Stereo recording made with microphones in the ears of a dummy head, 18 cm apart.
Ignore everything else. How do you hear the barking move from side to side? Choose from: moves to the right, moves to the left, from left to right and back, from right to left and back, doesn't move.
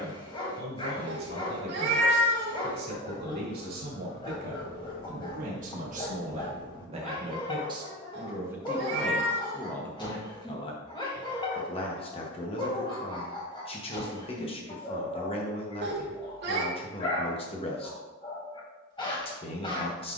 doesn't move.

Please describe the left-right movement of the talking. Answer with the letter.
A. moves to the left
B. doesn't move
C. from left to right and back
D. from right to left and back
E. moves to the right
A.